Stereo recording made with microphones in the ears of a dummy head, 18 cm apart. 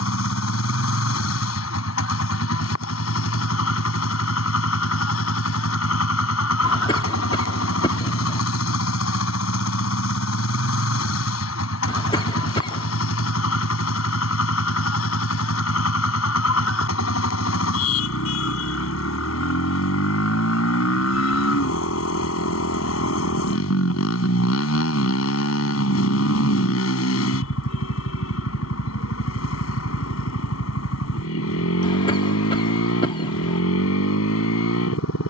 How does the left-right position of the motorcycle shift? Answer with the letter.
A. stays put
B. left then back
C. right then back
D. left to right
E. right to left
A.